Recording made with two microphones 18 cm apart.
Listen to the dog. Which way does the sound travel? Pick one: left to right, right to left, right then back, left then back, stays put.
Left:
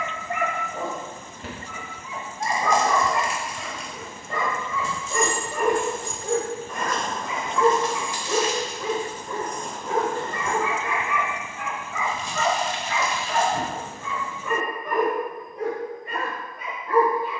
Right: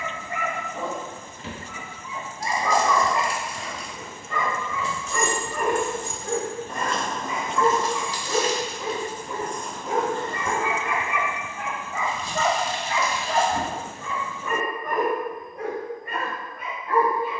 left to right.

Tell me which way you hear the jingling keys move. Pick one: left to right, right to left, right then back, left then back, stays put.
right to left.